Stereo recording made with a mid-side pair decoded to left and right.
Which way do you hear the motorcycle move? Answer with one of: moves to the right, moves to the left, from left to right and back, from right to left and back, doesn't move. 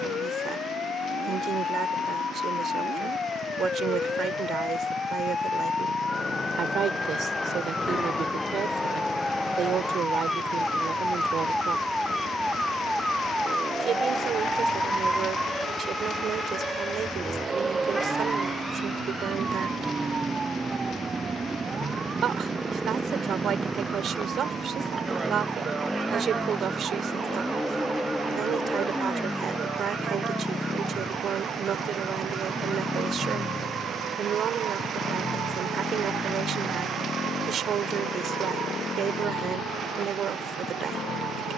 moves to the left.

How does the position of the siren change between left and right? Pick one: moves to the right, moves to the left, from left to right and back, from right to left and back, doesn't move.
moves to the right.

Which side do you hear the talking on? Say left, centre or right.
right.